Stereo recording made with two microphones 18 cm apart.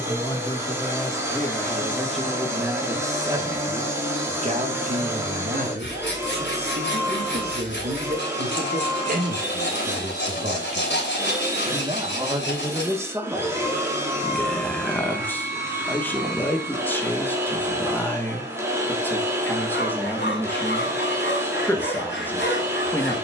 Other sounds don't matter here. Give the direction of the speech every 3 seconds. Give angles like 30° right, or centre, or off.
10° left, 40° right, 60° right, 40° right, 10° right, 10° left, 10° left, 10° left.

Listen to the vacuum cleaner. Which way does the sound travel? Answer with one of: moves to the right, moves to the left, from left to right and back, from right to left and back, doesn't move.
doesn't move.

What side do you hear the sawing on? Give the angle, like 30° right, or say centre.
70° left.